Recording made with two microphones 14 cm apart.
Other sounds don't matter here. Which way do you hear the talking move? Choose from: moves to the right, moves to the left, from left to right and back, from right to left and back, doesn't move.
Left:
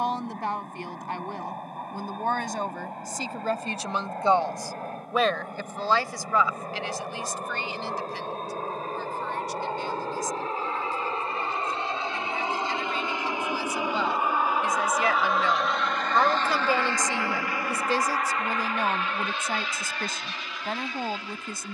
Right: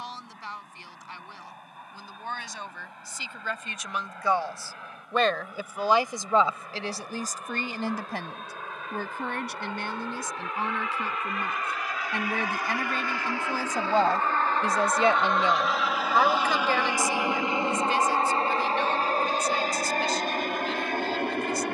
from left to right and back.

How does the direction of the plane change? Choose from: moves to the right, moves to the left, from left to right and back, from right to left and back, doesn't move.
moves to the right.